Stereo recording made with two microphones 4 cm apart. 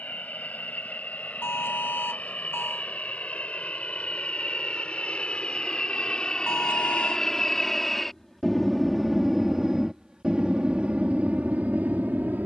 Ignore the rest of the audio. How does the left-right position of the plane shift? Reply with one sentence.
In this clip you hear the plane move from left to right.